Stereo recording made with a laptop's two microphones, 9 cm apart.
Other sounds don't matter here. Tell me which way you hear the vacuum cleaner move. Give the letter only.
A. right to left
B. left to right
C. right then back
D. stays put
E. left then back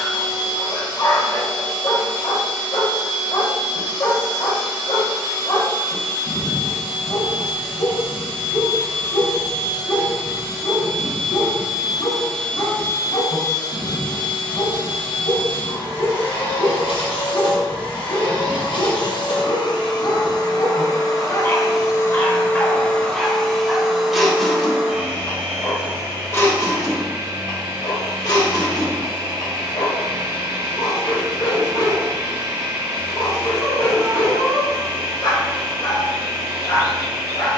E.